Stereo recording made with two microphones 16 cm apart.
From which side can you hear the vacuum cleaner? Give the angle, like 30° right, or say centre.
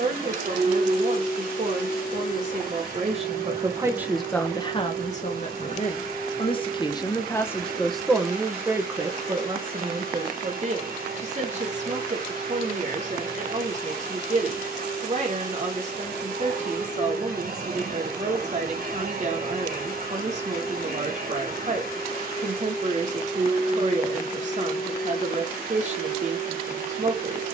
70° right.